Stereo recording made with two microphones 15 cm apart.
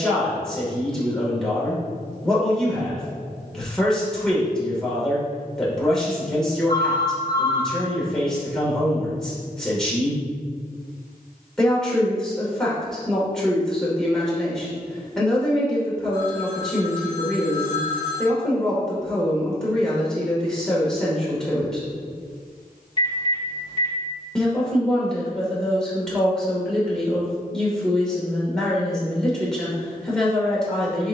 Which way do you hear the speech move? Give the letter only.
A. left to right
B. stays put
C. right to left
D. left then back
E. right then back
B.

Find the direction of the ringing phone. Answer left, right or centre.
left.